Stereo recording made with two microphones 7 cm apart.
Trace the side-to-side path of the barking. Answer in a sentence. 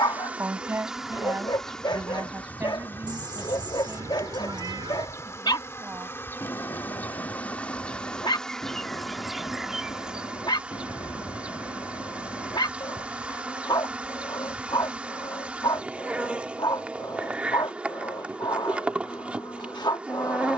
In this clip you hear the barking stay put.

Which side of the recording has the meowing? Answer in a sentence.
You can hear the meowing on the right.